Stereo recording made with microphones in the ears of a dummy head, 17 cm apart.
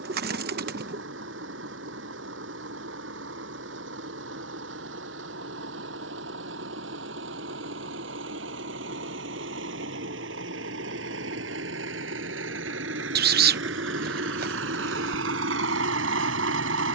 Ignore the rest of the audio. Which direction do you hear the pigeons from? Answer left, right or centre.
right.